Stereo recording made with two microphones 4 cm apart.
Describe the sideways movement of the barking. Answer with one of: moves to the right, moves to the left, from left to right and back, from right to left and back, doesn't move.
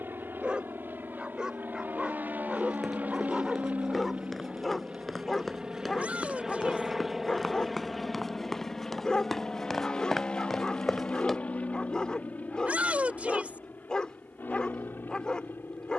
moves to the left.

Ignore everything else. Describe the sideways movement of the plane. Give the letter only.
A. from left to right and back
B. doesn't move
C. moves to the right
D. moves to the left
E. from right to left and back
D.